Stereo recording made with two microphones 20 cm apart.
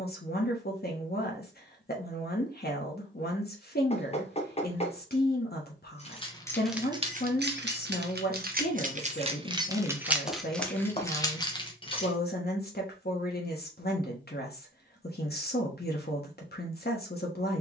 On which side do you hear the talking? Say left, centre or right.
left.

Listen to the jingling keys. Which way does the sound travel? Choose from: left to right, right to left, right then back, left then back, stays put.
right then back.